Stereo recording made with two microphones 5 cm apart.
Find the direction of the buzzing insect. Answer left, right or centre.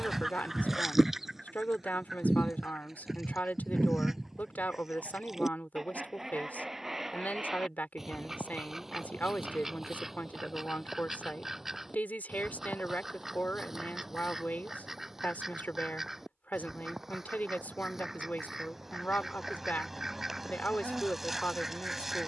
centre.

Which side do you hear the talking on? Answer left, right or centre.
left.